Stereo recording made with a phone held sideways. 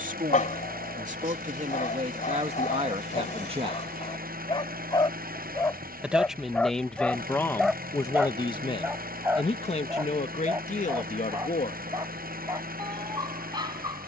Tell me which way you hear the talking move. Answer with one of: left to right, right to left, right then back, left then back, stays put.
right to left.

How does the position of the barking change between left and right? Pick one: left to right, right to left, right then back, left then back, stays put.
left to right.